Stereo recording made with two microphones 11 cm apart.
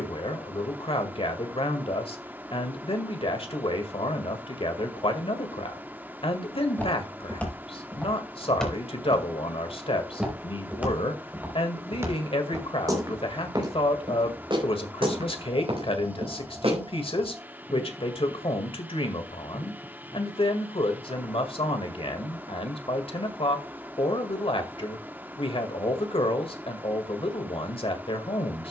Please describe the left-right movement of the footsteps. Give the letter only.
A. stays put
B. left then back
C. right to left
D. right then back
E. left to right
E.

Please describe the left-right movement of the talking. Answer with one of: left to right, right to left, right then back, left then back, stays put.
stays put.